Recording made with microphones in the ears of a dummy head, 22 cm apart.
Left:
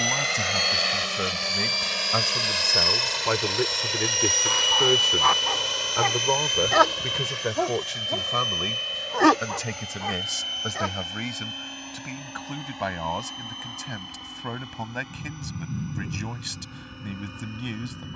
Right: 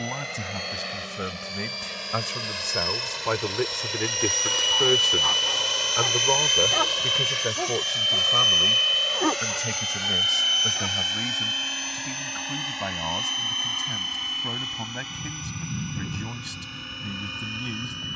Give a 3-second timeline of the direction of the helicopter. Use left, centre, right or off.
left, centre, right, right, right, right.